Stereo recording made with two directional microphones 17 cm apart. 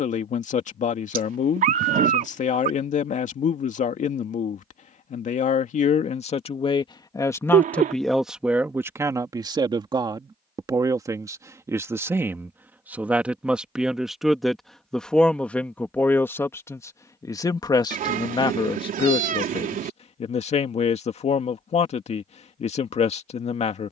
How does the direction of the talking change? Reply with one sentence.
In this clip you hear the talking go right and come back.